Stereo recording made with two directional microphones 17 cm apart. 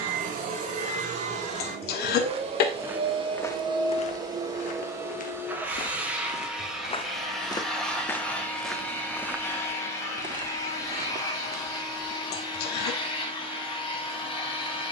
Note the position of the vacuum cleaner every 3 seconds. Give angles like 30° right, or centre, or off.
40° right, 20° right, centre, 20° left, 30° left.